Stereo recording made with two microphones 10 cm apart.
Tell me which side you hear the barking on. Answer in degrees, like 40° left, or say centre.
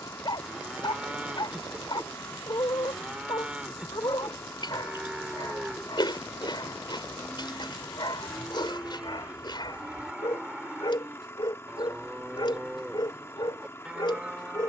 50° left.